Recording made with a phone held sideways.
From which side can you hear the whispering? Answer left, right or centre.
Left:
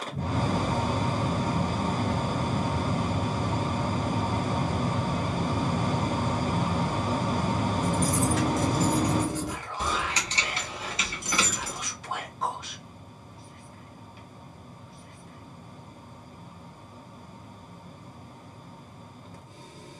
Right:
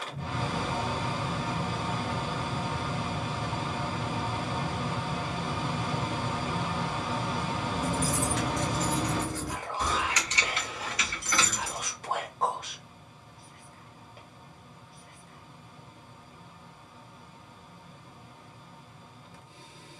right.